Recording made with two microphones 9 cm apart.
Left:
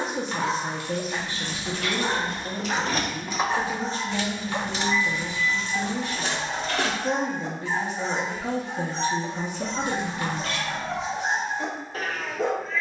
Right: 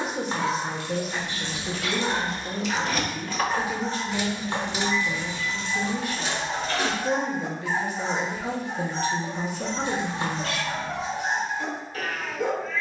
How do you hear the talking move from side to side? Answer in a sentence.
In this clip you hear the talking stay put.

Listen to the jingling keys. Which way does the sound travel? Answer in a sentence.
You can hear the jingling keys go right and come back.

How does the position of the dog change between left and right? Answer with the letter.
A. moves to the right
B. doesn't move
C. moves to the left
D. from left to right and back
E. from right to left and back
D.